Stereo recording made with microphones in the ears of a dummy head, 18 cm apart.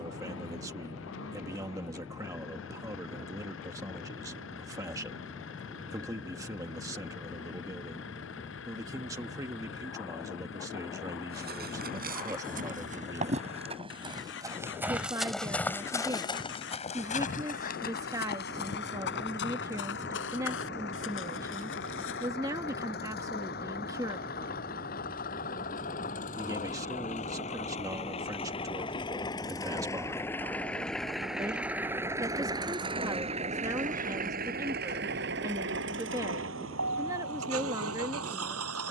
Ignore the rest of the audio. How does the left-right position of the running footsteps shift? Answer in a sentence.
In this clip you hear the running footsteps go from the right side to the left.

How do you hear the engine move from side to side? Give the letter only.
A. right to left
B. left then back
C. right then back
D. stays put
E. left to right
E.